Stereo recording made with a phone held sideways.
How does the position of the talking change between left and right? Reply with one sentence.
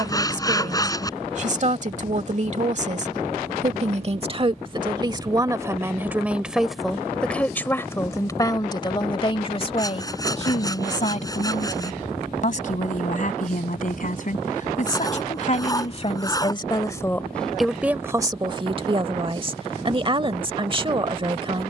In this clip you hear the talking move from right to left and back again.